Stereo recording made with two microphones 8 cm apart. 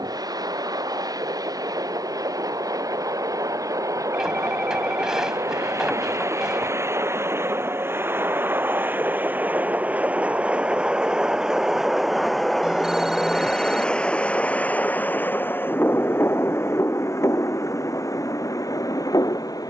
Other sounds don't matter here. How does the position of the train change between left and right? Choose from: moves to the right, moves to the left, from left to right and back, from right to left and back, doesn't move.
moves to the left.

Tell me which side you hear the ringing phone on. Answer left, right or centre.
centre.